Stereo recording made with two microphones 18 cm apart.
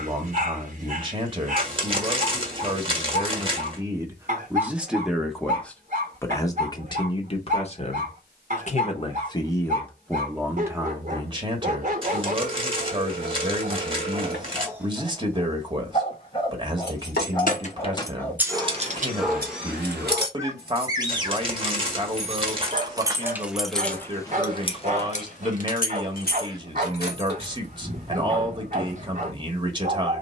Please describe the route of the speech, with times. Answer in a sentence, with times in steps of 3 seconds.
In this clip you hear the speech on the right from 0 s, in the centre from 3 s, on the left from 6 s, in the centre from 9 s and on the right from 12 s.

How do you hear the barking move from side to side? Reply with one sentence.
You can hear the barking move from right to left and back again.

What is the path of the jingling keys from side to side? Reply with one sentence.
You can hear the jingling keys move from left to right and back again.